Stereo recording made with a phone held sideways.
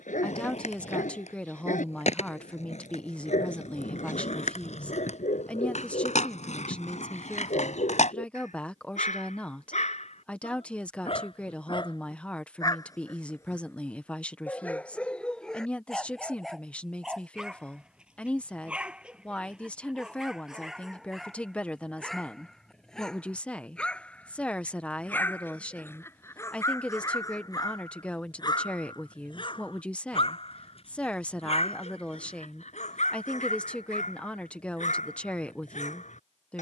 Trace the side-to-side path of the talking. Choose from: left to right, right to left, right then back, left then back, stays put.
stays put.